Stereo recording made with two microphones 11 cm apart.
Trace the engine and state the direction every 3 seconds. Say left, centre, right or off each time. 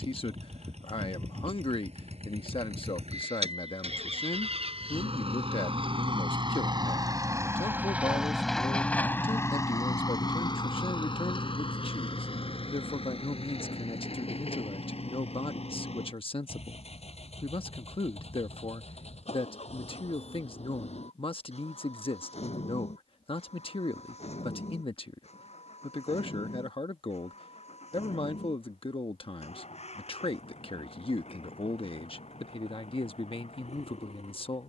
right, right, right, left, left, left, left, left, left, left, left, left.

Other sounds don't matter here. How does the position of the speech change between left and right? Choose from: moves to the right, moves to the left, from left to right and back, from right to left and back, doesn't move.
doesn't move.